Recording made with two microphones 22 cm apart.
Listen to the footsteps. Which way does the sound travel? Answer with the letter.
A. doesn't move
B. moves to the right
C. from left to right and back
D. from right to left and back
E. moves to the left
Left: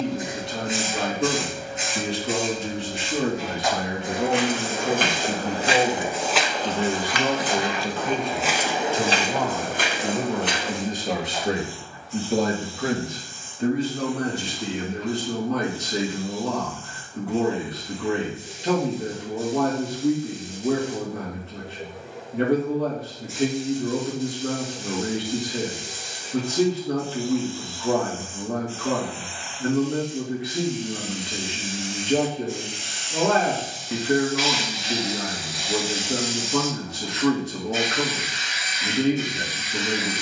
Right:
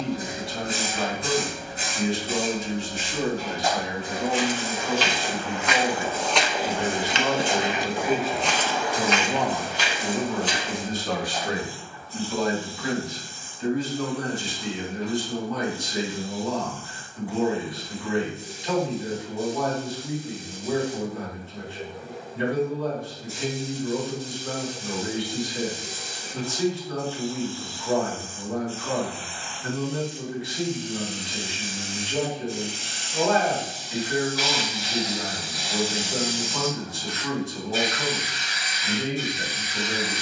C.